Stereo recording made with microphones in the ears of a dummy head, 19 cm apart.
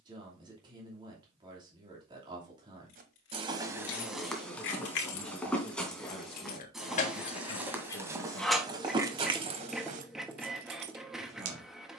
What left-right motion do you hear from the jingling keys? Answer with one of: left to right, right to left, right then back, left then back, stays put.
left to right.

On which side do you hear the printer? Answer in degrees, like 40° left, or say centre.
centre.